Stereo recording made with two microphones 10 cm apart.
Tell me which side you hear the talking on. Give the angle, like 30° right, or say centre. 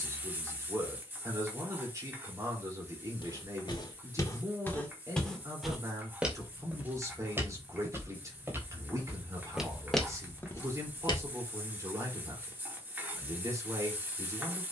30° right.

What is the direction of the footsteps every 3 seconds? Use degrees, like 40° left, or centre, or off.
off, 30° left, 20° right, 10° left, off.